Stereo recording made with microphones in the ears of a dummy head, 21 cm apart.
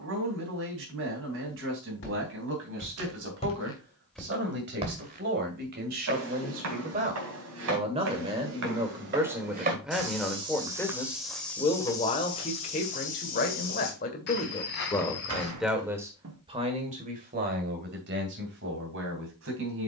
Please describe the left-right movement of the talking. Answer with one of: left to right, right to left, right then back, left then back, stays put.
left then back.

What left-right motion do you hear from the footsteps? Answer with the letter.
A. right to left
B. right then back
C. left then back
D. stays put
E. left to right
B.